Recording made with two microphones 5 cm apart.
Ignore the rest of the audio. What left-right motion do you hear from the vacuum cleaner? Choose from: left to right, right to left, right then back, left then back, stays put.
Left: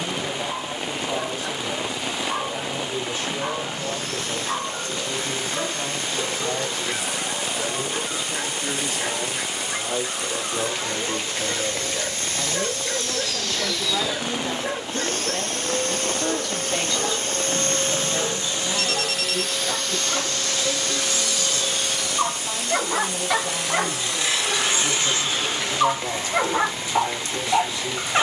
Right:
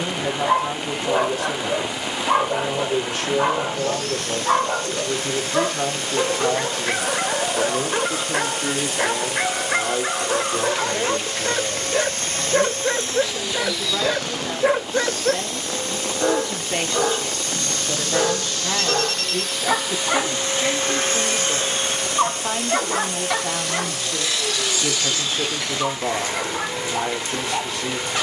left then back.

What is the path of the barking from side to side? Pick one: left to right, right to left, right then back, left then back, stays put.
right to left.